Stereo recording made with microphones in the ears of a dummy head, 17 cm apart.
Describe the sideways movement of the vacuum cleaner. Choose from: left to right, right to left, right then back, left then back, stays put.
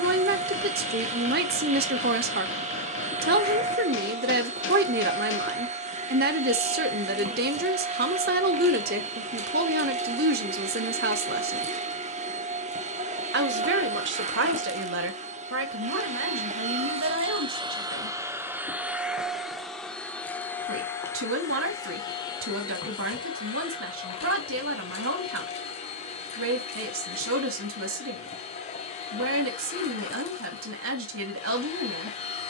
right to left.